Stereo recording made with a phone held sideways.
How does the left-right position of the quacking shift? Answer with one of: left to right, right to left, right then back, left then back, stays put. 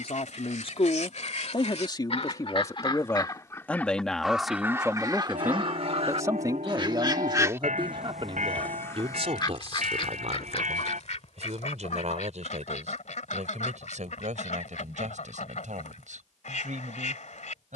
right then back.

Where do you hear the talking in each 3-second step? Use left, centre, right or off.
left, centre, right, right, right, right.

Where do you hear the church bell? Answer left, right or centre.
right.